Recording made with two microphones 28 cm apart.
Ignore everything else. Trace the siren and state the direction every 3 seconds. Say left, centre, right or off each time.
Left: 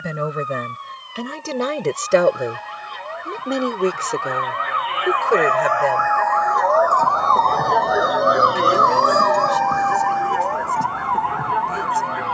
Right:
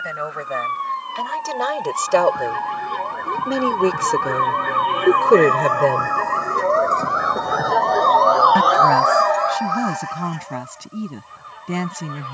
right, right, centre, left.